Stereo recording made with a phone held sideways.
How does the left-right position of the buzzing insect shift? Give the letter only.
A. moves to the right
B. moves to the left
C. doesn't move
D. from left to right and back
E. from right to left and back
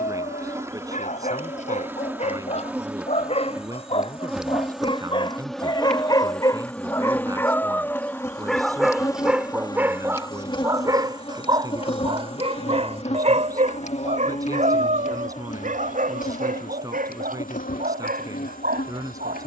B.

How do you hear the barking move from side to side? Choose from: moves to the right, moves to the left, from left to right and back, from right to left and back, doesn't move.
moves to the right.